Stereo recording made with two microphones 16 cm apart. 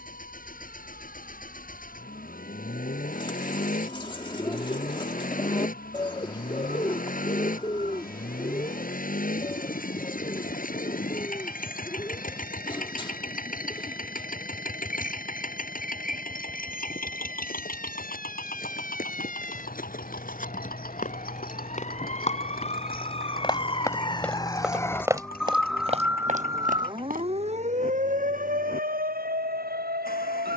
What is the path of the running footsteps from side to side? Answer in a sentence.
You can hear the running footsteps move to the right.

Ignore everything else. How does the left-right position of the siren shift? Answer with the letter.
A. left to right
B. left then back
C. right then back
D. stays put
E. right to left
A.